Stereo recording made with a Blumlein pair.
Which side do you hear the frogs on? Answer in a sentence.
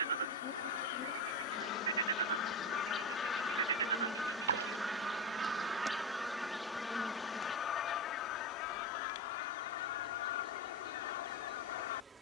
In this clip you hear the frogs on the right.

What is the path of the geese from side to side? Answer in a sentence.
In this clip you hear the geese go right and come back.